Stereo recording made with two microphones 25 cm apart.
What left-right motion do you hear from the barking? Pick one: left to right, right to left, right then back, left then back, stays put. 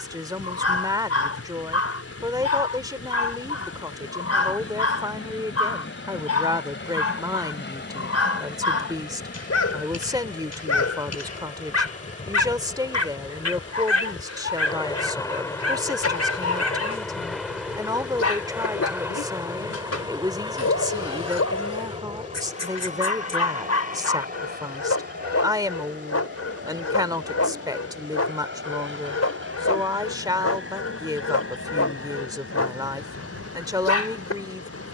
stays put.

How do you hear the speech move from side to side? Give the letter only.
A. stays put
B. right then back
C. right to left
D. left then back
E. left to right
A.